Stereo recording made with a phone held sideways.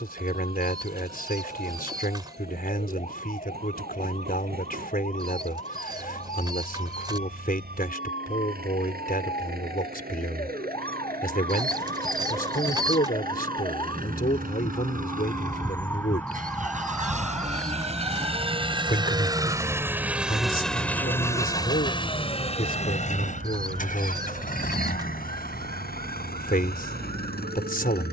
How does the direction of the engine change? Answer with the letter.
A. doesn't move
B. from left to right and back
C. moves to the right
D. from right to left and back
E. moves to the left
E.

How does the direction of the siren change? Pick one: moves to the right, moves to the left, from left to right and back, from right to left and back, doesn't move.
moves to the right.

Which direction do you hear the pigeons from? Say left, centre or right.
right.